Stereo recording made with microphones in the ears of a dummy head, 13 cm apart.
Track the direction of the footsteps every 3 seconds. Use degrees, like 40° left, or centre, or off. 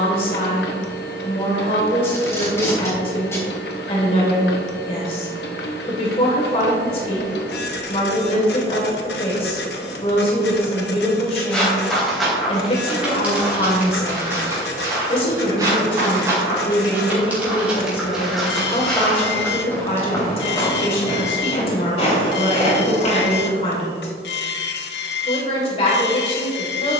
off, off, 50° left, 20° left, 10° right, 20° right, 10° left, 50° left, off.